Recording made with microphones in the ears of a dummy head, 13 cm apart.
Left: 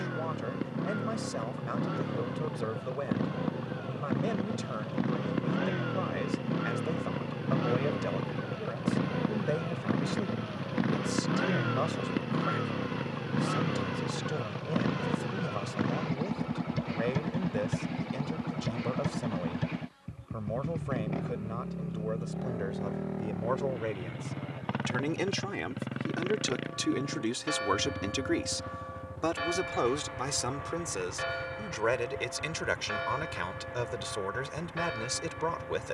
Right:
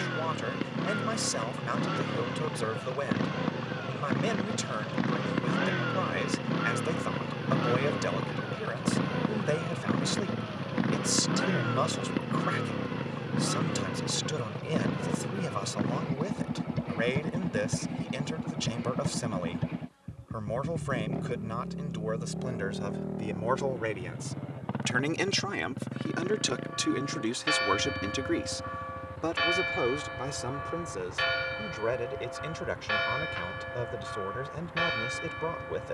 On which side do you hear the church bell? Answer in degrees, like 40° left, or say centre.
50° right.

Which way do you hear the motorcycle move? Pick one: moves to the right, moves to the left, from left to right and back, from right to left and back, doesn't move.
moves to the left.